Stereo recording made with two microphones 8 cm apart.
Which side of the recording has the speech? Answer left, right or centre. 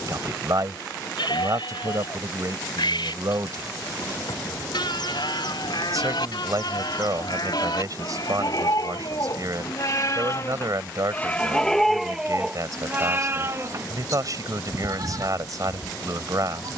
right.